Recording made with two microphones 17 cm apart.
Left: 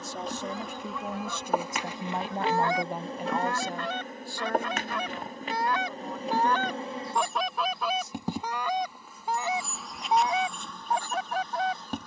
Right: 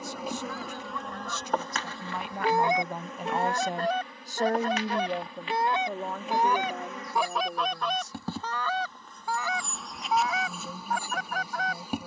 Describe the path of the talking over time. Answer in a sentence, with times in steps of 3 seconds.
You can hear the talking on the left from 0 s and on the right from 3 s.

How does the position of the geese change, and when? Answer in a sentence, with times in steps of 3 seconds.
You can hear the geese in the centre from 0 s, on the right from 3 s, in the centre from 6 s and on the left from 9 s.